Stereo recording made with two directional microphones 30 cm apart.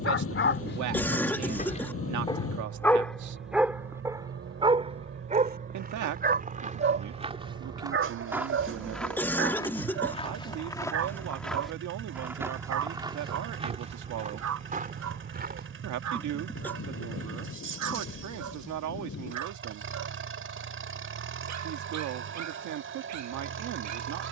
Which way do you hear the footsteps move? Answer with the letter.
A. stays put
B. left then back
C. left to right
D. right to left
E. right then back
B.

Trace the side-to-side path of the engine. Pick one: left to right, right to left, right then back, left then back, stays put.
stays put.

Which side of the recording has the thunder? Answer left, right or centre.
left.